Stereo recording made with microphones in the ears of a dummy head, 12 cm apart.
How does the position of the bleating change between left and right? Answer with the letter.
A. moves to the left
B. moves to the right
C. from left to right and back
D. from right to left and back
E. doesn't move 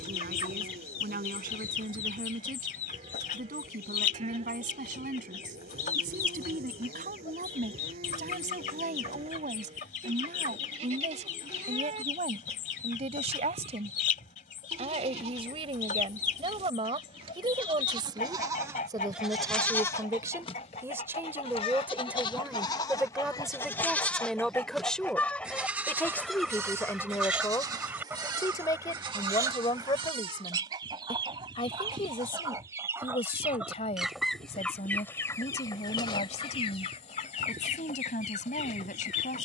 D.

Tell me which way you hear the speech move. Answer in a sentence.
You can hear the speech go from the right side to the left.